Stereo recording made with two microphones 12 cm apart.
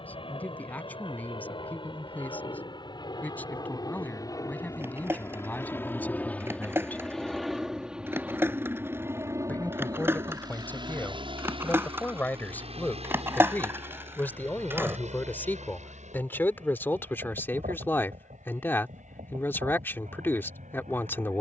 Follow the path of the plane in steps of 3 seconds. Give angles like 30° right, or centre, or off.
50° left, 30° left, centre, 40° right, 60° right, 70° right, 70° right.